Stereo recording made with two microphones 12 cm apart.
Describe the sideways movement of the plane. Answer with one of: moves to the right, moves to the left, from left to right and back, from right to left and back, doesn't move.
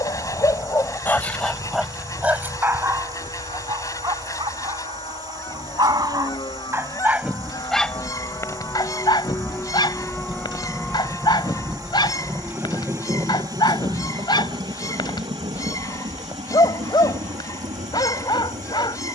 moves to the right.